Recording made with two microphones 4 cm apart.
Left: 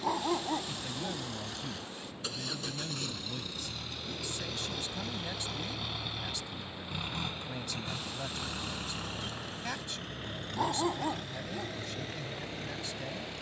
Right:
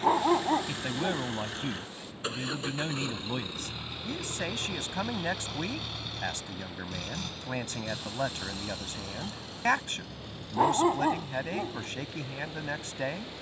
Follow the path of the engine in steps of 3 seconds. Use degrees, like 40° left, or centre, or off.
40° right, 10° right, 30° left, 50° left, 60° left.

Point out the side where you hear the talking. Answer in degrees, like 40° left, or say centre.
60° right.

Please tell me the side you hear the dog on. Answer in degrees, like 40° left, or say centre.
30° right.